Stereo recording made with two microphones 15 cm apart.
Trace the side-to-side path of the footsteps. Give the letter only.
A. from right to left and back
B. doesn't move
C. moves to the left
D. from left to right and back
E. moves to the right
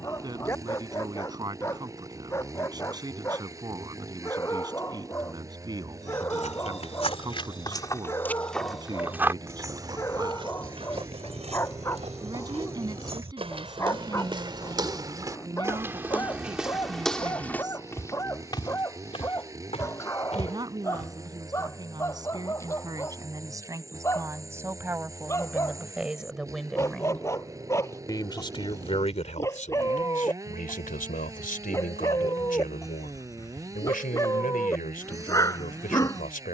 D.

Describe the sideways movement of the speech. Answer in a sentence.
In this clip you hear the speech move to the left.